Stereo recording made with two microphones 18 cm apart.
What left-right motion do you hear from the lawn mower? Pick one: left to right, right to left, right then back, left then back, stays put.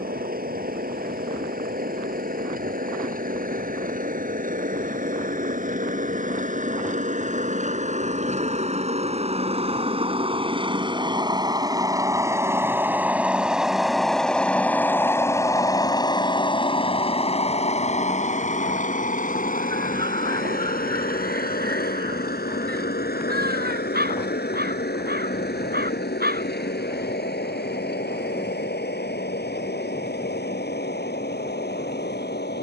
right to left.